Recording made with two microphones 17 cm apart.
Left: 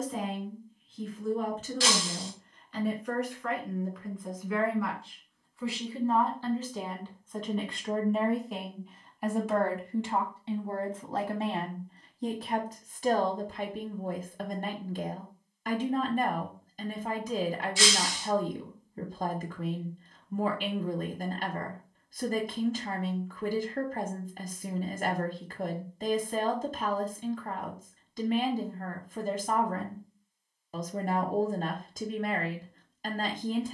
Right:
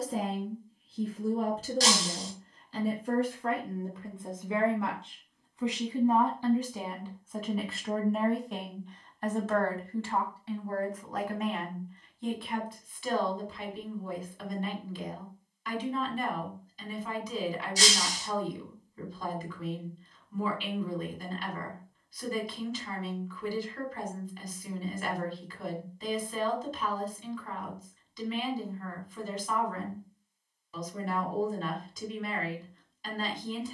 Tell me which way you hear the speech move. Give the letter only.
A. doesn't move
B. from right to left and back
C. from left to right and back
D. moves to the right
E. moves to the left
E.